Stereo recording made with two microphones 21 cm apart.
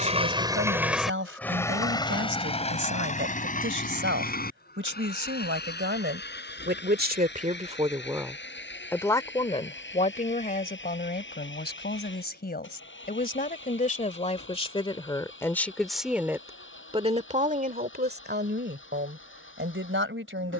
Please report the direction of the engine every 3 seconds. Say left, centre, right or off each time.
centre, left, left, left, left, left, left.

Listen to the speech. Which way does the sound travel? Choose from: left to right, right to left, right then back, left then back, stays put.
left then back.